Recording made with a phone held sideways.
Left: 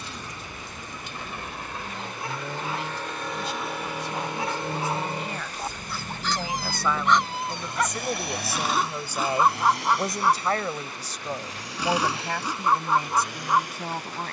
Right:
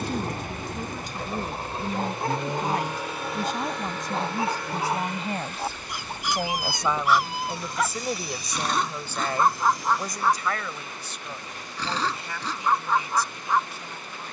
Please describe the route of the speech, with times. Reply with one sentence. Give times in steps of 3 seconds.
You can hear the speech on the right from 0 s, in the centre from 6 s and on the left from 9 s.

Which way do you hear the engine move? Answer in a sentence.
You can hear the engine go from the right side to the left.